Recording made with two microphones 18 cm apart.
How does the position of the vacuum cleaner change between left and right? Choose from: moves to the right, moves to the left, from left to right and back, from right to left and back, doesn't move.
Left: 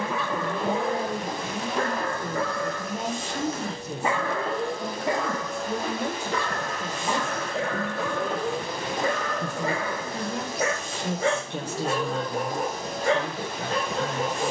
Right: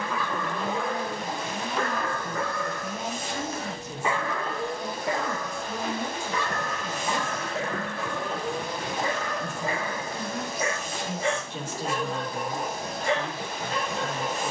doesn't move.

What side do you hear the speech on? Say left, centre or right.
left.